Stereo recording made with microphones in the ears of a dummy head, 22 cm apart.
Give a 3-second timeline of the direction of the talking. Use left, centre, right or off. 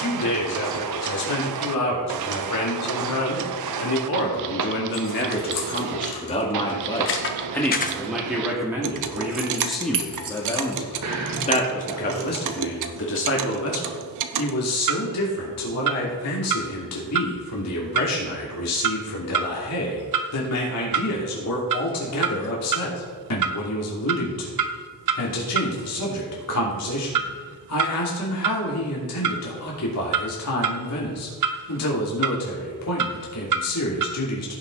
left, left, centre, centre, left, left, left, left, left, left, left, left.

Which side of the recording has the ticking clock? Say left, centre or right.
right.